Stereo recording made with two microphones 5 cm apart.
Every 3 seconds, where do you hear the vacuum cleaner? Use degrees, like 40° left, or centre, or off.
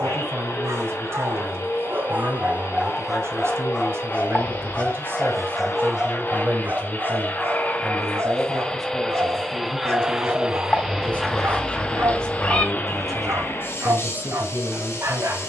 50° left, 50° left, 30° left, centre, 40° left.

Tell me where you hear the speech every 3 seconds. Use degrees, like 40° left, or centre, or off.
50° right, 50° right, 10° right, 20° left, 20° right.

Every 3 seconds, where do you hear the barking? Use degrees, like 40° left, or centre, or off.
40° right, 10° left, 40° right, 60° right, 60° right.